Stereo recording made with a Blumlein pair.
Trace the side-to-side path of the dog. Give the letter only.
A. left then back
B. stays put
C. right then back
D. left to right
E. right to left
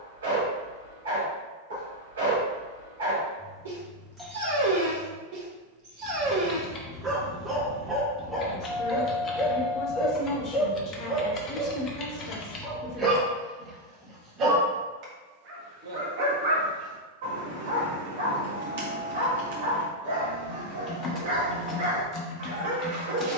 A.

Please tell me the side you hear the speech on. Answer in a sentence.
You can hear the speech on the left.